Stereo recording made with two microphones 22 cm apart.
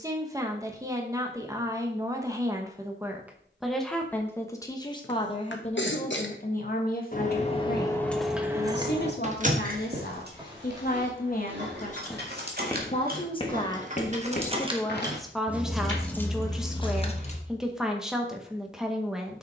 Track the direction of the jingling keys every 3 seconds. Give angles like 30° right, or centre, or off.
off, off, 10° left, 50° right, 40° right, 10° left, off.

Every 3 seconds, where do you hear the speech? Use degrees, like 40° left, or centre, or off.
20° right, 10° left, 50° left, 50° left, 20° left, centre, centre.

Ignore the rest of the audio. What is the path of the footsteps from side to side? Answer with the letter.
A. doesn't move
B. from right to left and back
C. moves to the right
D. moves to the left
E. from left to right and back
D.